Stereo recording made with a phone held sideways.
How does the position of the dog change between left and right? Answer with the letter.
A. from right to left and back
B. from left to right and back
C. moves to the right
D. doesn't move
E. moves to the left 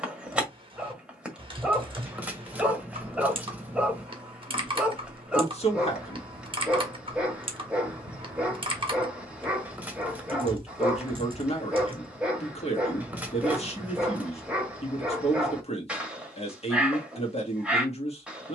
D.